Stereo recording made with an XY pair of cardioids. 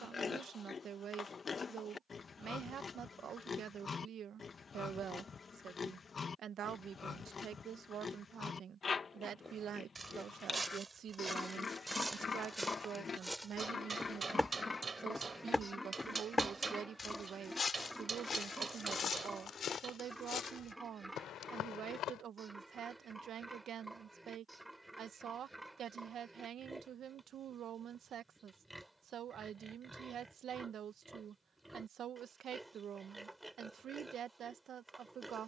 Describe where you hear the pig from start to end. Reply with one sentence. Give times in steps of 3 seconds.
You can hear the pig on the left from 0 s and in the centre from 15 s.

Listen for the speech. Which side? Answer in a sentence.
In this clip you hear the speech on the right.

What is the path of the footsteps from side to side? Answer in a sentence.
You can hear the footsteps move from right to left.